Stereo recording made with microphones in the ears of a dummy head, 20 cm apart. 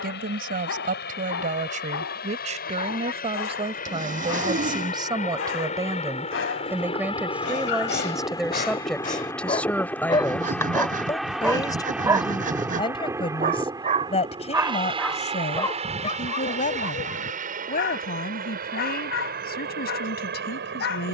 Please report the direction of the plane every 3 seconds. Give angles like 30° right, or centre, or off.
50° left, 40° left, 20° left, centre, 10° right, 30° right, 40° right.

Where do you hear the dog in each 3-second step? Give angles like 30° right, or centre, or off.
60° left, 60° left, 50° left, 20° left, 20° right, 30° left, 60° left.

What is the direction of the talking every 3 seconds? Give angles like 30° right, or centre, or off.
40° right, 20° right, 10° right, 10° left, 20° left, 30° left, 40° left.